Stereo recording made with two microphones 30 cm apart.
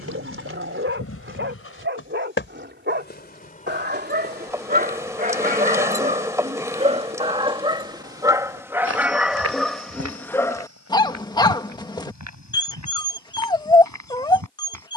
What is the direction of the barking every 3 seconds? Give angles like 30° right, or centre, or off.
40° right, 30° right, 20° right, 10° left, 10° left.